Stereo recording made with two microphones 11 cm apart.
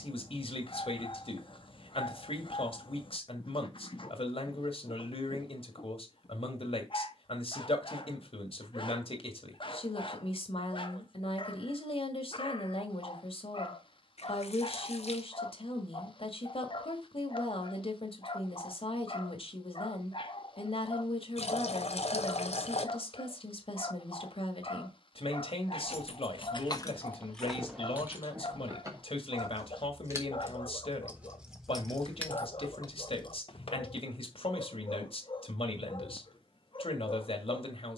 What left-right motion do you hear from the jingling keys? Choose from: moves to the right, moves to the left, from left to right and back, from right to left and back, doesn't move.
from left to right and back.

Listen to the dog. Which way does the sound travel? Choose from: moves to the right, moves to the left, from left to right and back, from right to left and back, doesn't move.
doesn't move.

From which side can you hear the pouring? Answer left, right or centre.
left.